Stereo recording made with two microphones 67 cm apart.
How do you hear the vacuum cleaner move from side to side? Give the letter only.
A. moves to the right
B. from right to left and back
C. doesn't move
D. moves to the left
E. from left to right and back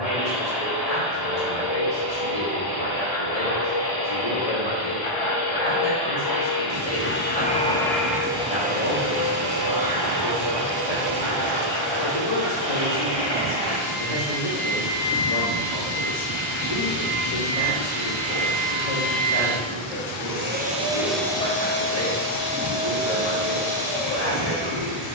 E.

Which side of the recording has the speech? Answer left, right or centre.
left.